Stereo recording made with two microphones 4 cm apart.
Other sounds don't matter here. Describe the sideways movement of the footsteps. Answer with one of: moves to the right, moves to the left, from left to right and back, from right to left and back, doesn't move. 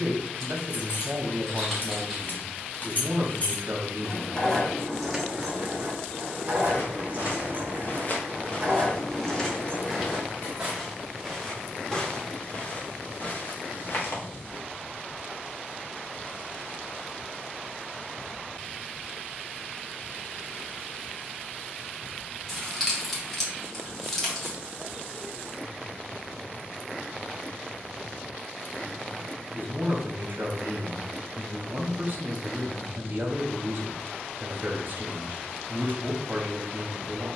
from left to right and back.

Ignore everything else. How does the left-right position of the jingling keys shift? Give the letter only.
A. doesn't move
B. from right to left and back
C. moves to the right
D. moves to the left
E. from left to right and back
E.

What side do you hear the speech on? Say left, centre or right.
right.